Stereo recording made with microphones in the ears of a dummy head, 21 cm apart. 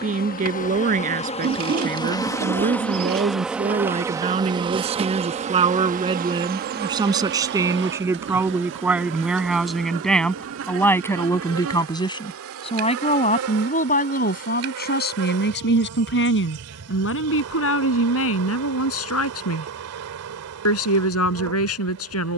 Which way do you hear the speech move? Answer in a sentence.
In this clip you hear the speech move to the left.